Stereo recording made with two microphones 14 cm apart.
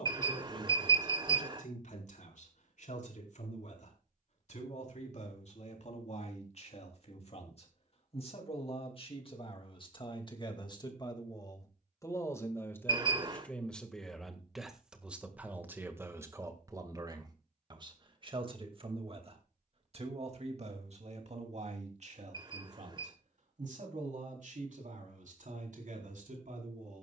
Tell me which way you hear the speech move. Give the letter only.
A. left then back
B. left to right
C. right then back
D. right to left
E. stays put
B.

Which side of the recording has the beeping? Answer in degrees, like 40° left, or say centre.
30° right.